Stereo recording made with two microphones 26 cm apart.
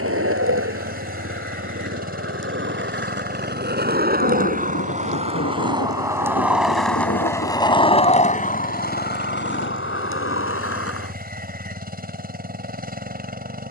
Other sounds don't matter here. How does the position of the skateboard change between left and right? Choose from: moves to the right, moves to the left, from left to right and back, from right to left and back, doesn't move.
moves to the left.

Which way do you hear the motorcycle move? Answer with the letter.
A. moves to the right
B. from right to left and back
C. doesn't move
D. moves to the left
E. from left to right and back
C.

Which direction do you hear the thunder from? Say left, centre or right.
left.